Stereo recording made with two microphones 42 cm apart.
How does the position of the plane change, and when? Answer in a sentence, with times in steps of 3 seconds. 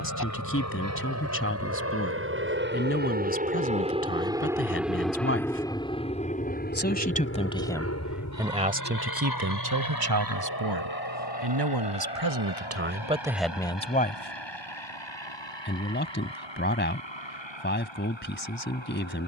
You can hear the plane on the right from 0 s, in the centre from 3 s and on the left from 6 s.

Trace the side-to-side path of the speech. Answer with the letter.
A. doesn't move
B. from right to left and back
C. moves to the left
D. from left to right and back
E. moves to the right
D.